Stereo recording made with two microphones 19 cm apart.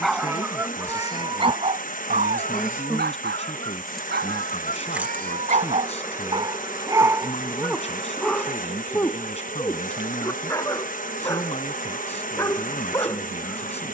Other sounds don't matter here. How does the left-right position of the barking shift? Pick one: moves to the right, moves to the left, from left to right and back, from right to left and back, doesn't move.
from left to right and back.